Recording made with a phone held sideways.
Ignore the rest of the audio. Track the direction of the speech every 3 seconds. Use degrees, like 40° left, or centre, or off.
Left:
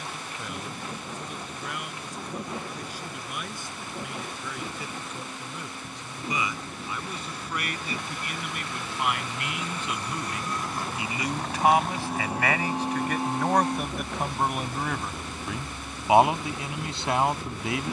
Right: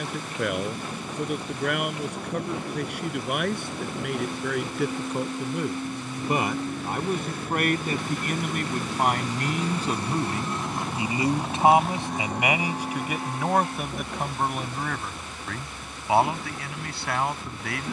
70° right, 70° right, 50° right, 30° right, 10° right, 20° left.